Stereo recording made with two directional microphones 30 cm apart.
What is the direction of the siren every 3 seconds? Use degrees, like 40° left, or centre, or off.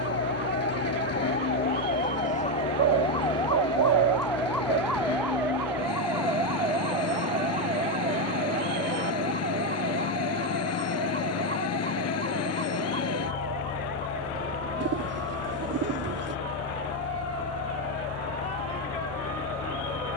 30° left, centre, 20° right, 30° right, 40° right, 50° right, 50° right.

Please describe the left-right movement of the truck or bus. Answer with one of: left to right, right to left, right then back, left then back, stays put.
stays put.